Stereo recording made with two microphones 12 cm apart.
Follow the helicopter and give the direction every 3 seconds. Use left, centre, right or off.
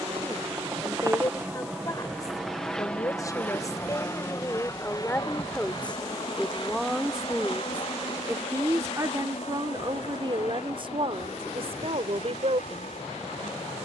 centre, left, left, left, left.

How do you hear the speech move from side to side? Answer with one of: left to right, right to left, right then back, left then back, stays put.
left to right.